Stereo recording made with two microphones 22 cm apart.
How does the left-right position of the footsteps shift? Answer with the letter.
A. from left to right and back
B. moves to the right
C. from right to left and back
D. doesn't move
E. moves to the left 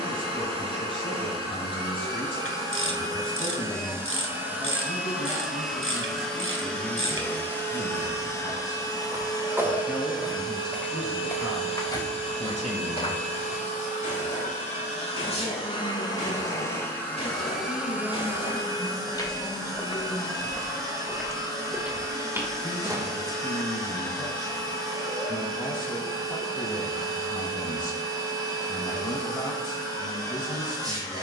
C.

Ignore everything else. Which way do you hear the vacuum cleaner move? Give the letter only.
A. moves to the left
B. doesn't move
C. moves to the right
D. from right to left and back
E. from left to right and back
D.